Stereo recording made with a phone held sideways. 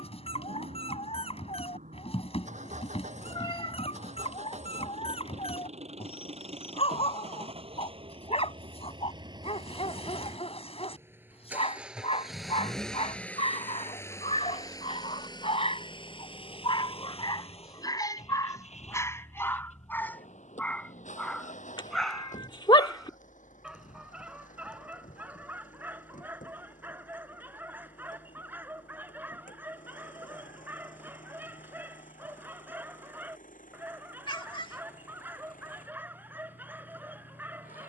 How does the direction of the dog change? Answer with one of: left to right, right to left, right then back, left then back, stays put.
left to right.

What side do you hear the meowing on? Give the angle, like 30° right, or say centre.
40° left.